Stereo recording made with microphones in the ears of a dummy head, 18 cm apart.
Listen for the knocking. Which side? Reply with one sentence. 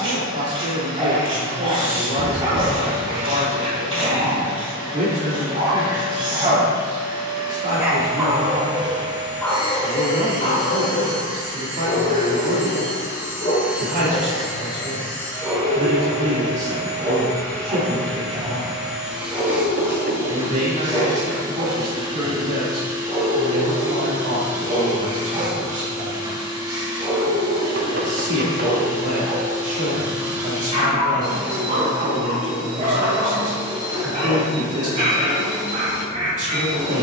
You can hear the knocking on the right.